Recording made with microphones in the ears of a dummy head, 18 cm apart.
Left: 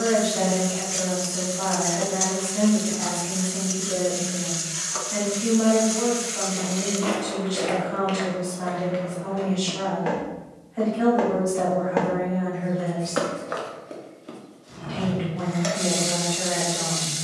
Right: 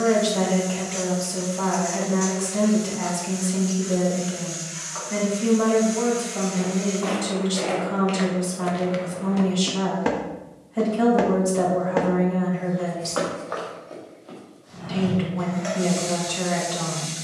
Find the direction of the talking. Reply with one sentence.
You can hear the talking on the right.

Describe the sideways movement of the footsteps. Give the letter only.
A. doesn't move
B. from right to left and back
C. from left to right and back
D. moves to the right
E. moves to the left
C.